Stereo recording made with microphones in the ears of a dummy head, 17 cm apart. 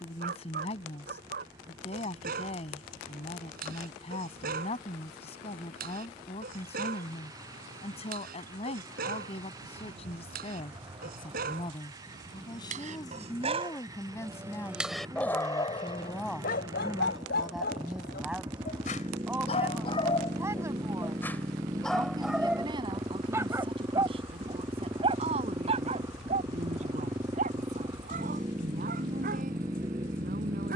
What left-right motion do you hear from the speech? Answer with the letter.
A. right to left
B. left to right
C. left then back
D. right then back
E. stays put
B.